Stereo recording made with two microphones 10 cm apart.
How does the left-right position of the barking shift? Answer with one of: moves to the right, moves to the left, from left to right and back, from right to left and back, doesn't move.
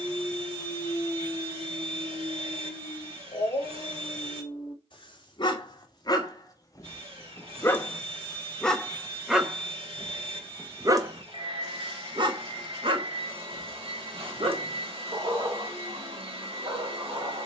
moves to the right.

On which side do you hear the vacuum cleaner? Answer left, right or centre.
right.